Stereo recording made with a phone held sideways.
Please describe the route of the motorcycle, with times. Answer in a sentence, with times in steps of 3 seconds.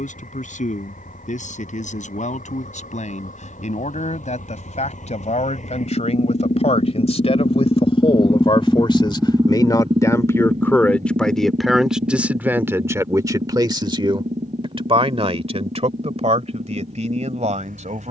In this clip you hear the motorcycle on the left from 0 s and on the right from 9 s.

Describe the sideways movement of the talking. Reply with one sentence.
You can hear the talking travel towards the right.